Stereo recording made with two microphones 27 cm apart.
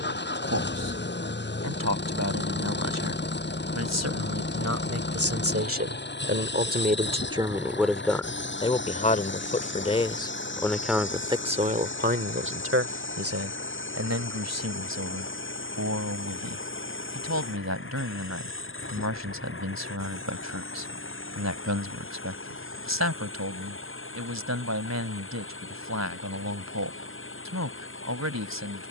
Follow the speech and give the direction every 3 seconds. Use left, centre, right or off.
right, right, centre, centre, right, right, right, right, right, right.